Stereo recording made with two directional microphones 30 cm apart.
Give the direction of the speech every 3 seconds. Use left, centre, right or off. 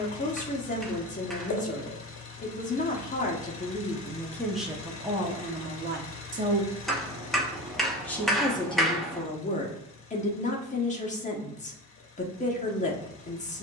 left, centre, centre, left, left.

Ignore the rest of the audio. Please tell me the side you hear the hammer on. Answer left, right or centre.
centre.